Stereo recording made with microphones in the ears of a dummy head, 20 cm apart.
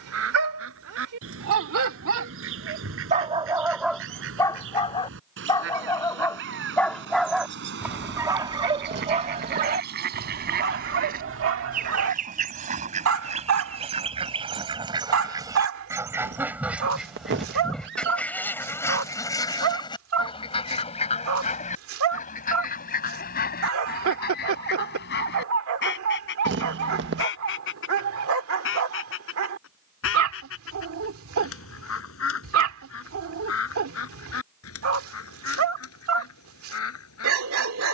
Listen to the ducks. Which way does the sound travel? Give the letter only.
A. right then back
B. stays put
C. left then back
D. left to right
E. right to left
E.